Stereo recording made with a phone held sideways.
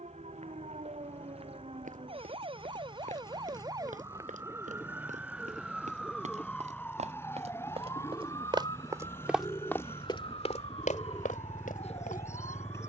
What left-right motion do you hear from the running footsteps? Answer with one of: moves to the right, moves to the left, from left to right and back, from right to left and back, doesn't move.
moves to the left.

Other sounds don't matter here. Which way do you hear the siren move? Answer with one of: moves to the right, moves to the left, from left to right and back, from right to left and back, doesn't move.
moves to the left.